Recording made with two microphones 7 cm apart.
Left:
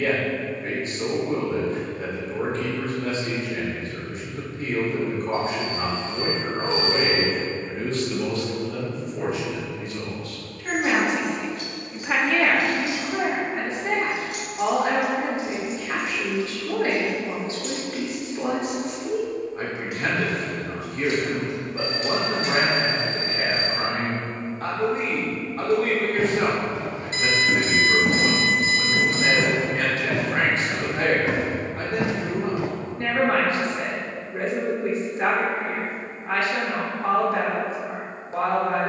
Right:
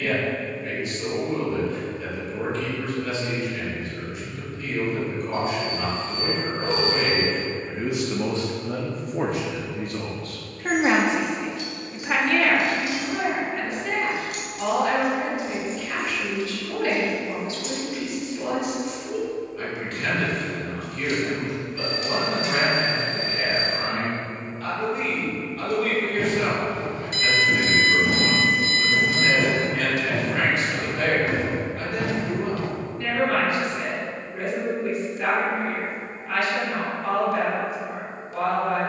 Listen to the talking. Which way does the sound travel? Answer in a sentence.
You can hear the talking go right and come back.